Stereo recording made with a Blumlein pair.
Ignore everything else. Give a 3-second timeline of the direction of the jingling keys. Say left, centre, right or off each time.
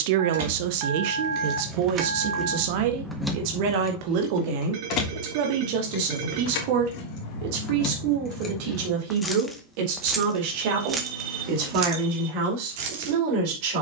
right, left, left, centre, right.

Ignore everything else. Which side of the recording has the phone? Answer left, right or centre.
right.